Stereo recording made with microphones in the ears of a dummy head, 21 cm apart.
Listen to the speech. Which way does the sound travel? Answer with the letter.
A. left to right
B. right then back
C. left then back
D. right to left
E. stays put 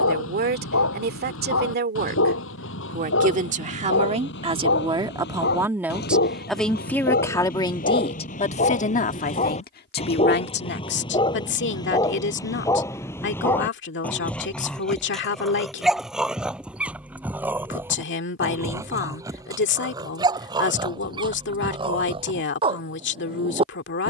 D.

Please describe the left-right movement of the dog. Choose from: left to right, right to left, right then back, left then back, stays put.
left to right.